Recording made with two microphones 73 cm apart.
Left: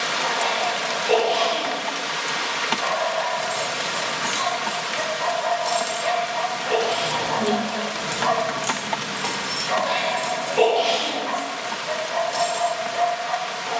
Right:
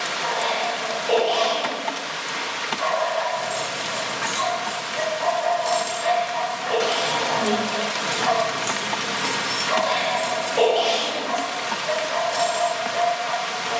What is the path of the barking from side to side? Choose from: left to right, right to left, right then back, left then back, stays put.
left then back.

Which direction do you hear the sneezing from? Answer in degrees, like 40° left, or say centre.
20° right.